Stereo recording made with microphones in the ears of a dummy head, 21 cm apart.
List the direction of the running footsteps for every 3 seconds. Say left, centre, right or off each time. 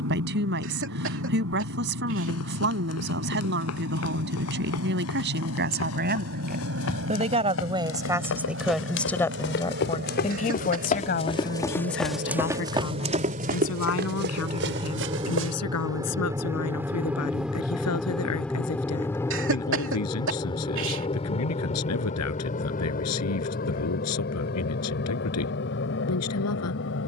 left, left, left, left, right, right, off, off, off.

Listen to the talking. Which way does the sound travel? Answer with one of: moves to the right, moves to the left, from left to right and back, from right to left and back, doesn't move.
moves to the left.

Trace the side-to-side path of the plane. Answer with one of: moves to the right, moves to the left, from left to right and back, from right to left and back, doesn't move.
moves to the left.